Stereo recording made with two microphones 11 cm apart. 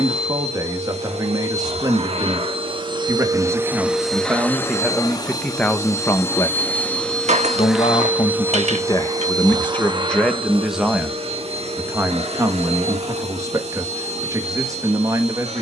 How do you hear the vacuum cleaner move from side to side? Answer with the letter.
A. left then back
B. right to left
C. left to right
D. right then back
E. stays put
A.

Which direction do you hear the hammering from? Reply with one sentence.
In this clip you hear the hammering on the right.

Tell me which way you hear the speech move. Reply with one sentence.
In this clip you hear the speech go left and come back.